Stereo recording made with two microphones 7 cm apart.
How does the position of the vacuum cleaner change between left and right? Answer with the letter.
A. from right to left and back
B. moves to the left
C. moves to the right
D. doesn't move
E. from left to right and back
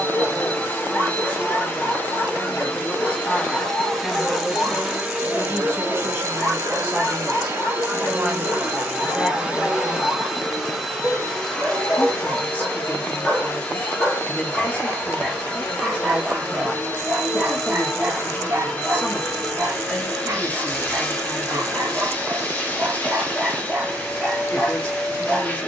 E.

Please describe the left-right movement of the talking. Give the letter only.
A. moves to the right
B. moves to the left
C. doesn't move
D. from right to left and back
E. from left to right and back
E.